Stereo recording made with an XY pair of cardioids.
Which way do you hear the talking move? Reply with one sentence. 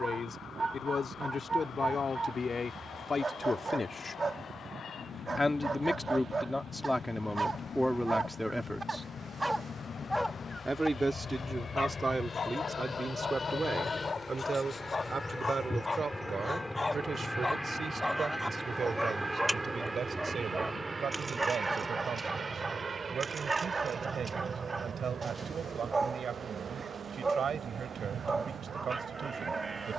You can hear the talking go from the left side to the right.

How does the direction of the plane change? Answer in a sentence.
In this clip you hear the plane move from left to right.